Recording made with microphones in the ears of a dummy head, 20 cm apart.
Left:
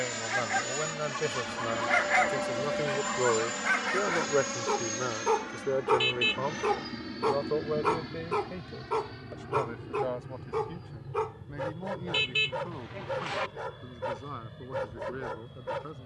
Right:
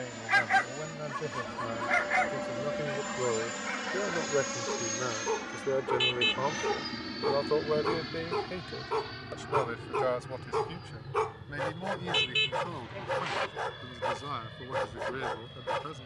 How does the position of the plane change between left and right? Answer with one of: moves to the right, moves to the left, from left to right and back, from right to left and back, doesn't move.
moves to the right.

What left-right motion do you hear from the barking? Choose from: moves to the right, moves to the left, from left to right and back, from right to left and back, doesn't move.
from right to left and back.